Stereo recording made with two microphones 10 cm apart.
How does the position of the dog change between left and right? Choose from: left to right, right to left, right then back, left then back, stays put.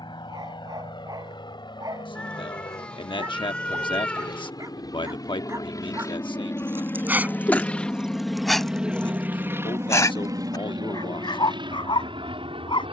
right to left.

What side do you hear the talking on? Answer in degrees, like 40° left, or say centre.
60° left.